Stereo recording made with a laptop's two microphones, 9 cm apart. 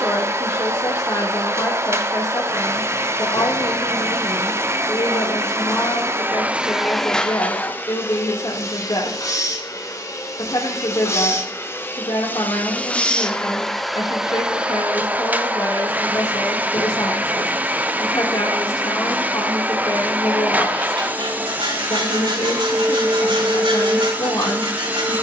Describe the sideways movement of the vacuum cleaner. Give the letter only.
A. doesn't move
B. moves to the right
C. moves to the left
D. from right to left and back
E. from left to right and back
D.